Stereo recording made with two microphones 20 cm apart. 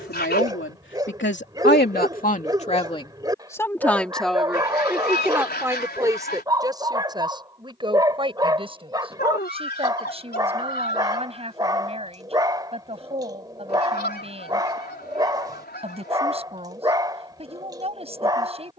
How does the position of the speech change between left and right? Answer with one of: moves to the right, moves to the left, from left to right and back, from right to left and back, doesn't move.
moves to the right.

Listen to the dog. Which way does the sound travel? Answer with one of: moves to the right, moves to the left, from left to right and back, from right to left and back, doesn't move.
doesn't move.